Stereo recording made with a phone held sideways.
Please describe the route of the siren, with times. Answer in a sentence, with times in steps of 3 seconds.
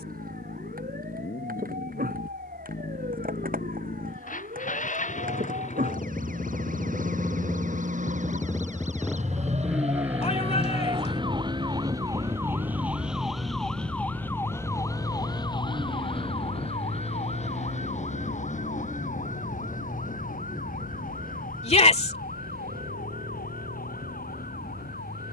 You can hear the siren on the right from 0 s, in the centre from 12 s and on the left from 15 s.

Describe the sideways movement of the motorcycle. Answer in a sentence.
In this clip you hear the motorcycle move to the right.